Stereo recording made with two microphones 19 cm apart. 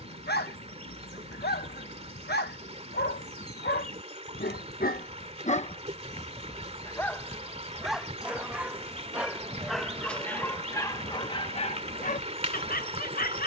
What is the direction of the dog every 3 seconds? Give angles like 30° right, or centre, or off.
60° left, 50° left, centre, 10° left, 50° left.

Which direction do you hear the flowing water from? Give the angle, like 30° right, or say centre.
30° right.